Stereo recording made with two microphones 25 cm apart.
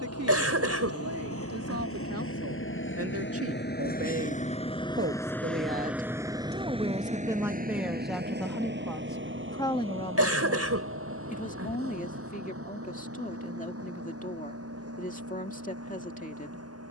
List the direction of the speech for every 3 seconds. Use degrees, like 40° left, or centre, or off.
80° right, 50° right, 10° right, 20° left, 30° left, 30° left.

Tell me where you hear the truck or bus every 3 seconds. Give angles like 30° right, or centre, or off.
60° left, 30° left, 30° right, 60° right, 60° right, 70° right.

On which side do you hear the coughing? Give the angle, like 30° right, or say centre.
70° right.